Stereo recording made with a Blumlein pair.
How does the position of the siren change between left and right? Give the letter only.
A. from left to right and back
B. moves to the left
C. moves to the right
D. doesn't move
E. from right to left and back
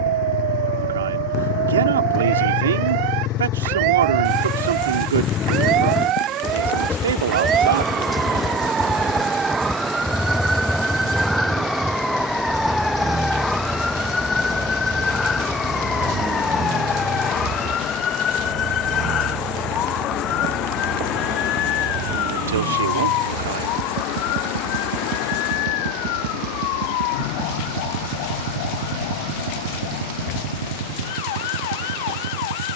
B.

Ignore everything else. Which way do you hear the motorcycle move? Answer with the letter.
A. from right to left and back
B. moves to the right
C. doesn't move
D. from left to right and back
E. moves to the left
B.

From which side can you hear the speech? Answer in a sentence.
You can hear the speech on the right.